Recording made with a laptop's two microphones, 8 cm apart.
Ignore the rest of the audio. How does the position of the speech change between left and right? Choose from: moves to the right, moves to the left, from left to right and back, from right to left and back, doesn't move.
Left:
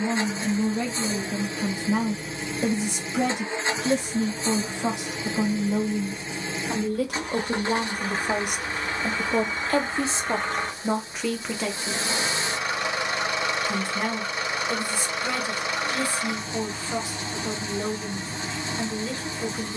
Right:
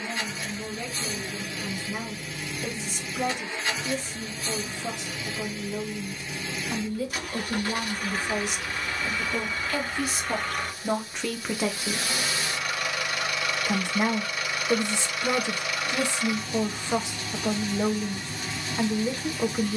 moves to the right.